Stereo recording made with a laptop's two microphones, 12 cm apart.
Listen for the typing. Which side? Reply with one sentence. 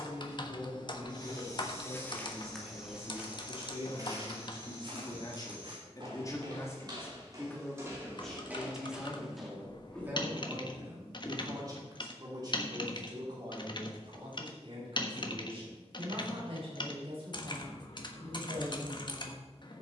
In this clip you hear the typing on the left.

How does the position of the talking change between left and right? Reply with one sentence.
In this clip you hear the talking travel towards the right.